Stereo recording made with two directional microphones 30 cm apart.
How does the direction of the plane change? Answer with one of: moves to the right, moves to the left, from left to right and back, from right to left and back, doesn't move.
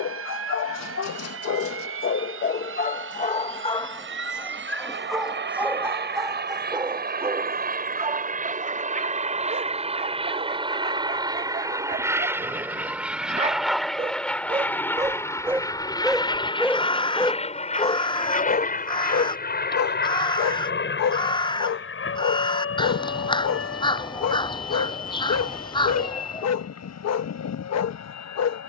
moves to the left.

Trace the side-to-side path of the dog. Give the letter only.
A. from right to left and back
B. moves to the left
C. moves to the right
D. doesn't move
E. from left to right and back
E.